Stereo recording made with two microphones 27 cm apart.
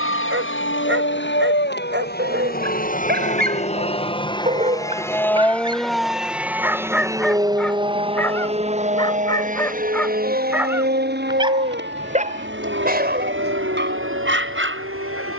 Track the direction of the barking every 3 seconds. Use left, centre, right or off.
right, right, centre, centre, right.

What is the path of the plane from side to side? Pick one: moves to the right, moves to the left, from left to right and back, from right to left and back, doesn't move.
moves to the right.